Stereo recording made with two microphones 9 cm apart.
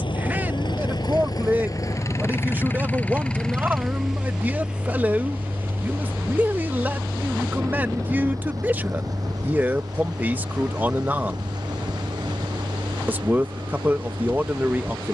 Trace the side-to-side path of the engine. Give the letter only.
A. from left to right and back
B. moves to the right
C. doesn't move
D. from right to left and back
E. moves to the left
B.